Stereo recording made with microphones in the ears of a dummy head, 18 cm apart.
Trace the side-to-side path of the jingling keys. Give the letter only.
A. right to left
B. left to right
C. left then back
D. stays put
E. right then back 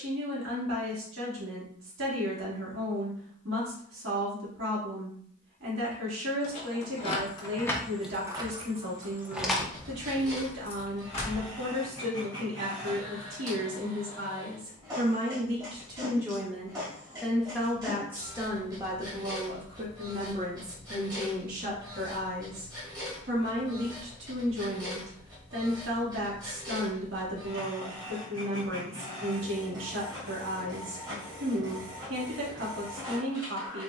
E.